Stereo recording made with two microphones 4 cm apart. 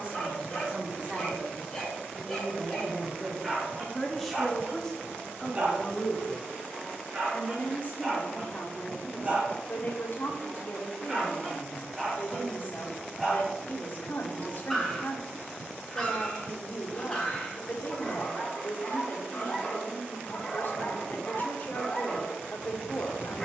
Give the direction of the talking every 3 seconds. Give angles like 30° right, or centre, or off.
20° right, 10° left, 40° left, 50° left, 50° left, 50° left, 50° left, 50° left.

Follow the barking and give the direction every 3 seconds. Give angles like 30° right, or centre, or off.
10° left, 20° right, 30° right, 10° right, centre, 10° left, 20° left, 20° left.